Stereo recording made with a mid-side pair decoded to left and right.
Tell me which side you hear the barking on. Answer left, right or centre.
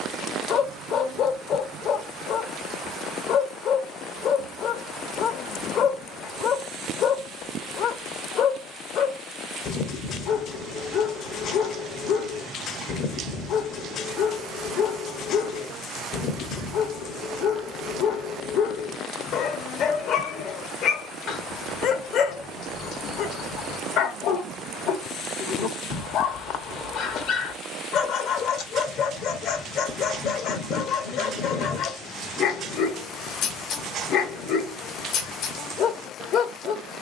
left.